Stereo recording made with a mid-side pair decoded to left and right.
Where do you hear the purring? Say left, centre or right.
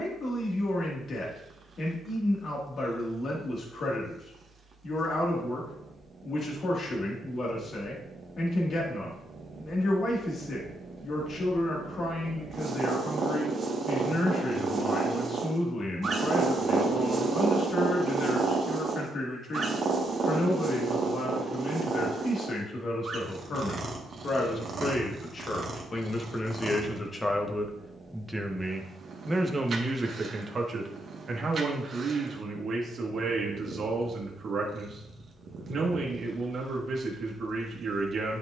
right.